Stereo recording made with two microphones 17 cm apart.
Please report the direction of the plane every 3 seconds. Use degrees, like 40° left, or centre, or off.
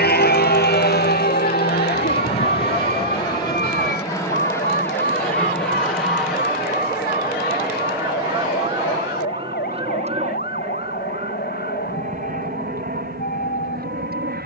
30° left, 20° left, 10° right, 40° right, 50° right.